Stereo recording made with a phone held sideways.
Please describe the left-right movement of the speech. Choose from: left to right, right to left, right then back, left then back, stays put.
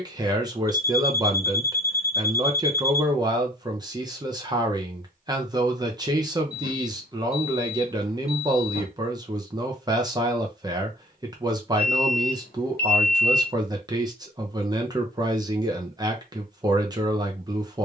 stays put.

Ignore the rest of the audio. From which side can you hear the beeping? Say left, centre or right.
left.